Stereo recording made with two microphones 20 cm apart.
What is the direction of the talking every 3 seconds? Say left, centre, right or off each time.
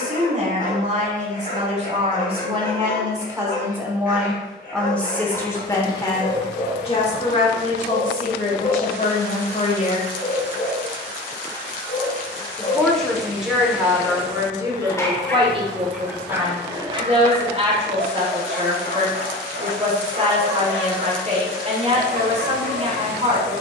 right, centre, left, left, centre, right, right, right.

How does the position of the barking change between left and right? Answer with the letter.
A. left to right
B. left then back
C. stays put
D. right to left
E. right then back
A.